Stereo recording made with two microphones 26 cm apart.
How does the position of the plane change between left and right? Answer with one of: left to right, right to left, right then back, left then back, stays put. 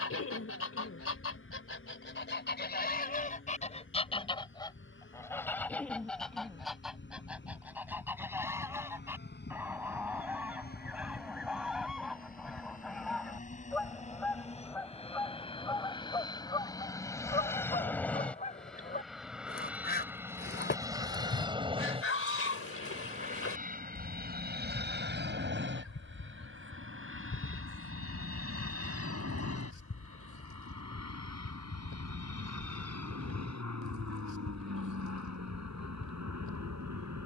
left to right.